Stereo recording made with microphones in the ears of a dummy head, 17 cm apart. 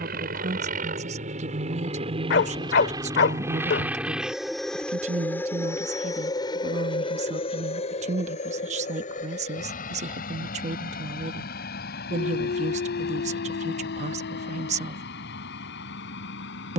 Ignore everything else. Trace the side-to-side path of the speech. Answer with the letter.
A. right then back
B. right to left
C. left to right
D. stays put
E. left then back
D.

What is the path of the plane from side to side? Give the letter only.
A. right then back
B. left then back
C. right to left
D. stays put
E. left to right
C.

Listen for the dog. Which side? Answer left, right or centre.
left.